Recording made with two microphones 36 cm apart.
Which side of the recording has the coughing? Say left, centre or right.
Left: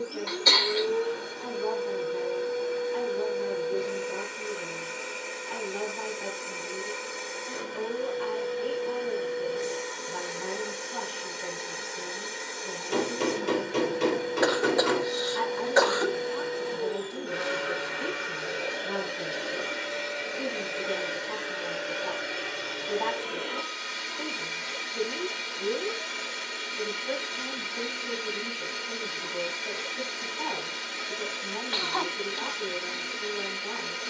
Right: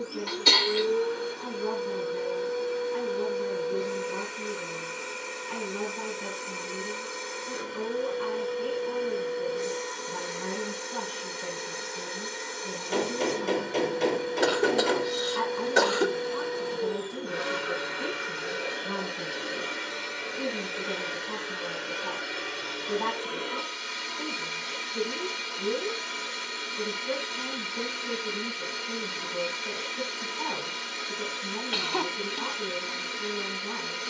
right.